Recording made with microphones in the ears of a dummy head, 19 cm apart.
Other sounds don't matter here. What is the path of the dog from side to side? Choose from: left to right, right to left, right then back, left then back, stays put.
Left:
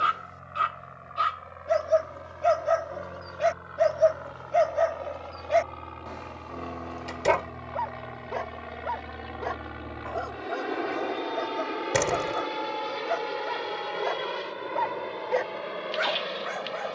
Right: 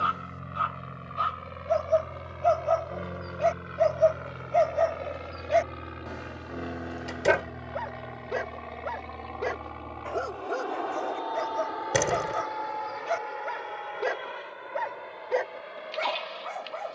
right then back.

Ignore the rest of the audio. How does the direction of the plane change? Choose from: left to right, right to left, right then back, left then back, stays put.
right to left.